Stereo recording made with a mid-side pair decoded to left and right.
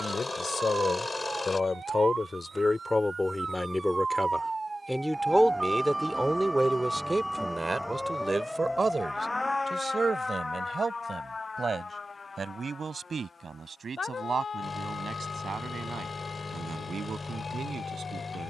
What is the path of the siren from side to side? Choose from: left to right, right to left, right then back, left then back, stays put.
right to left.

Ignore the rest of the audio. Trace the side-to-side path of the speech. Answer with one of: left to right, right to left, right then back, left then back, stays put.
left to right.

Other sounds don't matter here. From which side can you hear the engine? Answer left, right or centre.
left.